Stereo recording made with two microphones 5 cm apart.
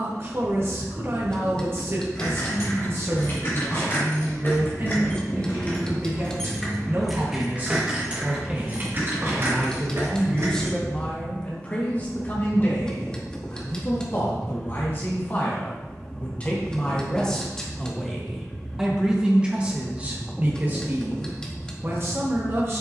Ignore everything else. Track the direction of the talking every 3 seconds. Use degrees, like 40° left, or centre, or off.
40° right, 40° right, 30° right, 10° left, 40° left, 20° left, 20° right, 40° right.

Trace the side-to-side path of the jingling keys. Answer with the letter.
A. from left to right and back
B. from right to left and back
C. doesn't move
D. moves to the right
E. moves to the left
D.